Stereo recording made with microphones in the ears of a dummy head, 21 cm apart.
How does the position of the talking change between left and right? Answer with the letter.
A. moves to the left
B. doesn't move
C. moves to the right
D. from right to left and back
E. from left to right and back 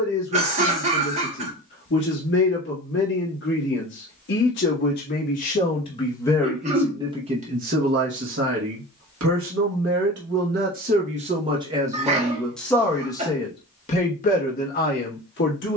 E.